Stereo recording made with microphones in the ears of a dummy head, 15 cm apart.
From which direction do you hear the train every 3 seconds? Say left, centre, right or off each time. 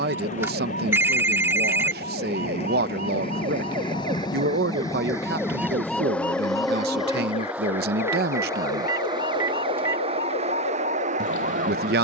left, left, centre, right.